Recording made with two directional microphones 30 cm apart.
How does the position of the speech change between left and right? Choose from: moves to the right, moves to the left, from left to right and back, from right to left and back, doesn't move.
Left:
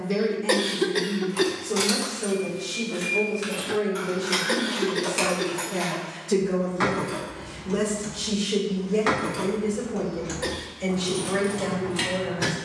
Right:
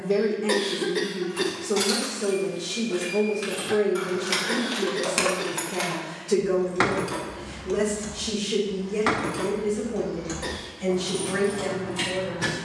moves to the left.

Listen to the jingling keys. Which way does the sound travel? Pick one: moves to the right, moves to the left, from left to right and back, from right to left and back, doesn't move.
from left to right and back.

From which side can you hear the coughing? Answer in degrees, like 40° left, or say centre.
20° left.